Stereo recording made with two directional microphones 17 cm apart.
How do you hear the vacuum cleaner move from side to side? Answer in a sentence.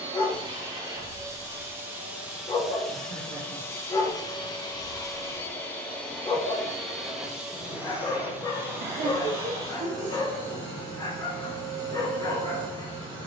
In this clip you hear the vacuum cleaner move from right to left and back again.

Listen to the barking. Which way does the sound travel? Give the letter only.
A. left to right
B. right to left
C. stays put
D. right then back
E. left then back
C.